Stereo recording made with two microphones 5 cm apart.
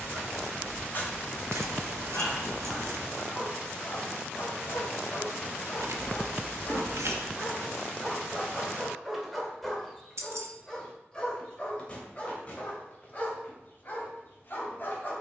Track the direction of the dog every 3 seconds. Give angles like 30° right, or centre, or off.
40° left, 40° left, 10° left, 10° left, 40° left.